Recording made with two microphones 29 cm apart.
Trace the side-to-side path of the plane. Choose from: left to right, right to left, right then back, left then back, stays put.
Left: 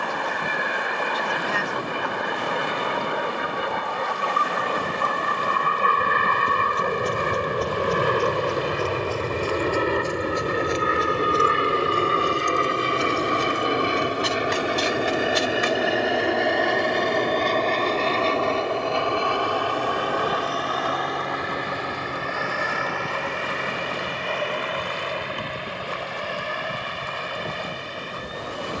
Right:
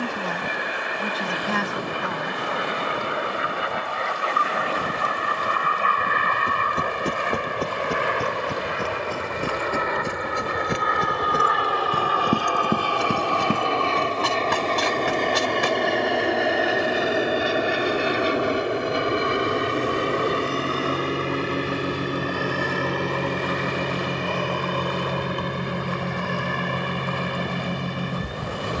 left to right.